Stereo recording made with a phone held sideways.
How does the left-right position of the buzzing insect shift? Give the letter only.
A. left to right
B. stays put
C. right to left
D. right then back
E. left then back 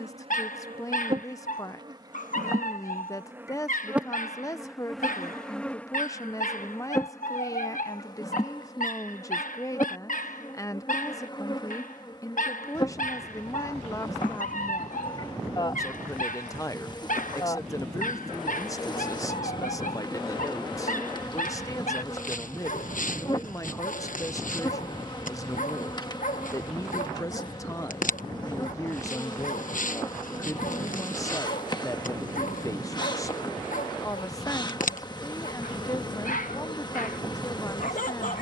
C.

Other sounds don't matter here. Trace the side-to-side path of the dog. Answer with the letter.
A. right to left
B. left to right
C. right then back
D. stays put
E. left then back
D.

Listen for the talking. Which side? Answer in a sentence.
In this clip you hear the talking on the left.